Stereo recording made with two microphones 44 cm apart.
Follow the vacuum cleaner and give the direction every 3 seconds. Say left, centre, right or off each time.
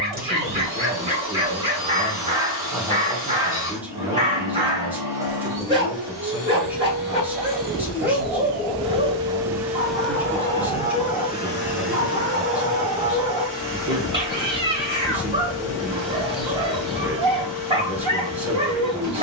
right, right, right, centre, left, left, left.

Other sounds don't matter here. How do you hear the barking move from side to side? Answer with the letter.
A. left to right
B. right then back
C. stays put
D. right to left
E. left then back
C.